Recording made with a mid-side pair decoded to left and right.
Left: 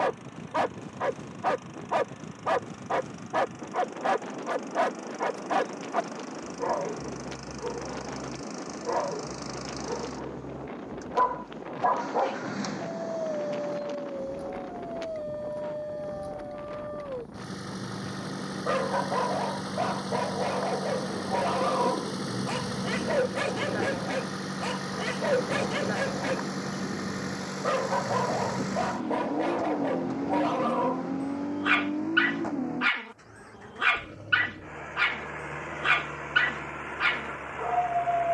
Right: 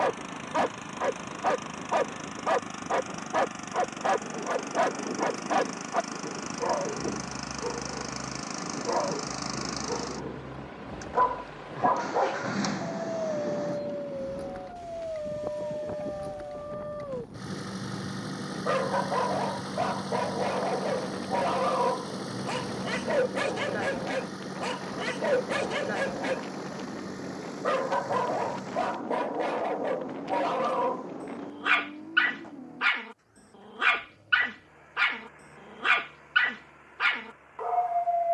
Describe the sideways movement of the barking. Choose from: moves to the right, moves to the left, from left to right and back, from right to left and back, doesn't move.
doesn't move.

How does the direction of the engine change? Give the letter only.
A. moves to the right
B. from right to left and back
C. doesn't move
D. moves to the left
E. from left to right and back
D.